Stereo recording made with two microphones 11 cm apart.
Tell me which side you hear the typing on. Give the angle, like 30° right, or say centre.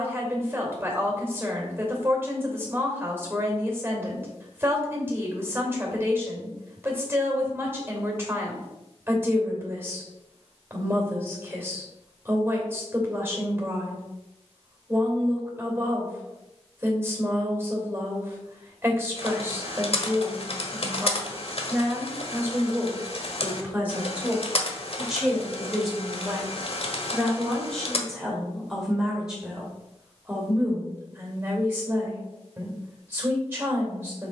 60° left.